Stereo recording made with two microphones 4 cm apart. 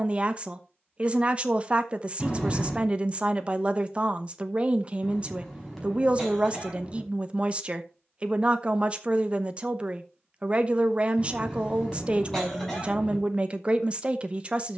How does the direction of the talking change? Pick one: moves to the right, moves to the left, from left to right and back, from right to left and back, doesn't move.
doesn't move.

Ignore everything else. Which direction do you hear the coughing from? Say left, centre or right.
centre.